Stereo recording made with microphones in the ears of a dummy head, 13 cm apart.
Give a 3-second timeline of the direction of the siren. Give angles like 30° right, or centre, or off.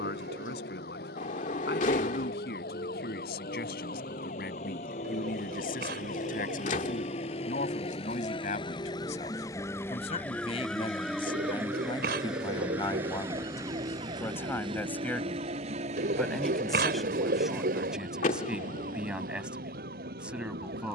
70° left, 60° left, 40° left, 10° left, 30° right, 50° right, 60° right.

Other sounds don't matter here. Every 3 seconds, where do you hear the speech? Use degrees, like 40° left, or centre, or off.
80° left, 70° left, 60° left, 40° left, 20° left, centre, 10° right.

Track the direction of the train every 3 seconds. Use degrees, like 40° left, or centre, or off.
60° left, 50° left, 40° left, 10° left, 20° right, 50° right, 70° right.